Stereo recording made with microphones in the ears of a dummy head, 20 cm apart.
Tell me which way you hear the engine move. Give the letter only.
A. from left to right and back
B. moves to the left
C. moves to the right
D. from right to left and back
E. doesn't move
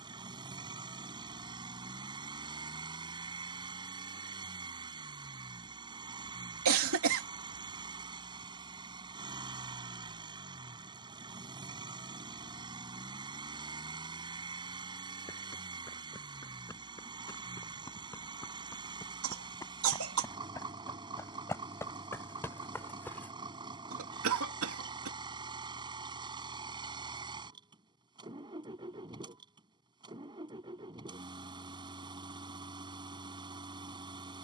E.